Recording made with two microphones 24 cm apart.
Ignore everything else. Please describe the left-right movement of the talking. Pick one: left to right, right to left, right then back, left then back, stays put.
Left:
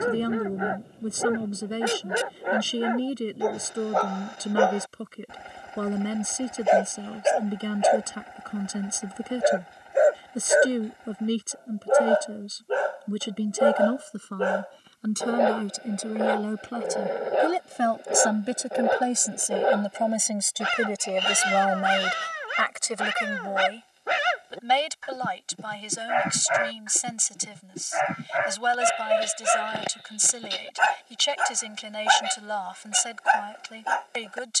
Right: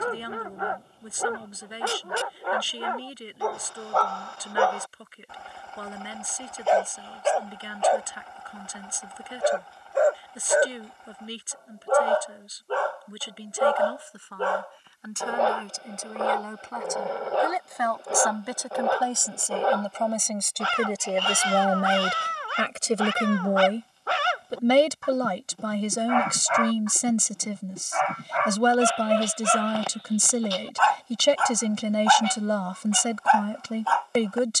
left to right.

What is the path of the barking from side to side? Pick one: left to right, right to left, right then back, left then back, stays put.
stays put.